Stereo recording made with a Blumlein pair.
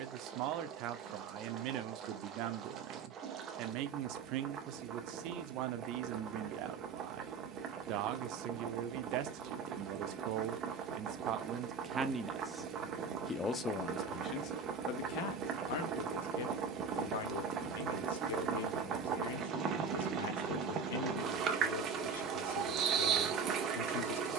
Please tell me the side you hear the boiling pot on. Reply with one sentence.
In this clip you hear the boiling pot on the right.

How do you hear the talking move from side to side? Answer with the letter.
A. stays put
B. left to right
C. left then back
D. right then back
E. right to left
E.